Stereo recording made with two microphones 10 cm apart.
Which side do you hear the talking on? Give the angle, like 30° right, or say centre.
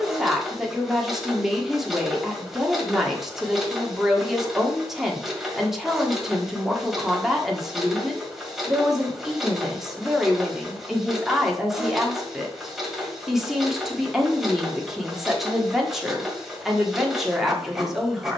centre.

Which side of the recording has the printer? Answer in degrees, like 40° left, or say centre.
centre.